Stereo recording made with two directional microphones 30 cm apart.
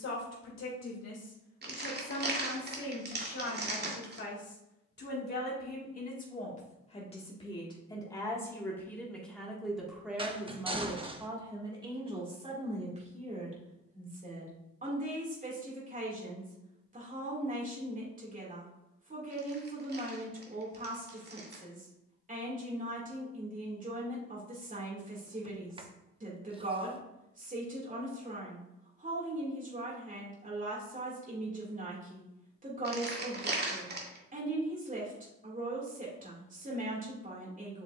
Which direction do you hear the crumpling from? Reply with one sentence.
In this clip you hear the crumpling on the right.